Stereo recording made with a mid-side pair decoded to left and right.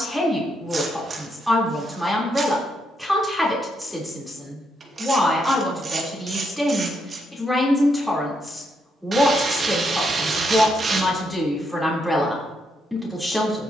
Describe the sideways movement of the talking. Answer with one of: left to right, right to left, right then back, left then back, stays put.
stays put.